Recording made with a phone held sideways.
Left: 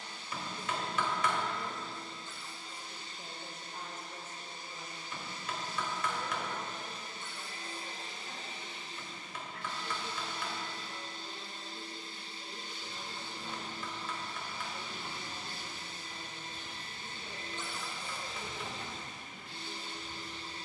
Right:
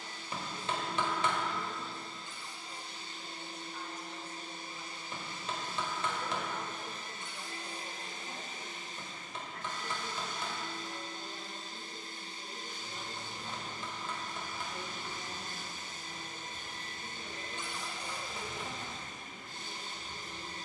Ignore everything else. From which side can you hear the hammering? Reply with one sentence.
In this clip you hear the hammering on the right.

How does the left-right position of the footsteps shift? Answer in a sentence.
You can hear the footsteps move to the left.